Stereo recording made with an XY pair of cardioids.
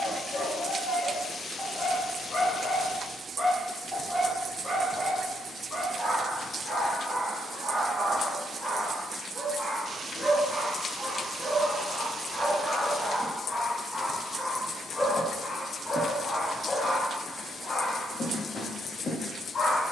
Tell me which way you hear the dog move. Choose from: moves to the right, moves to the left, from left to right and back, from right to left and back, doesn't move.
from left to right and back.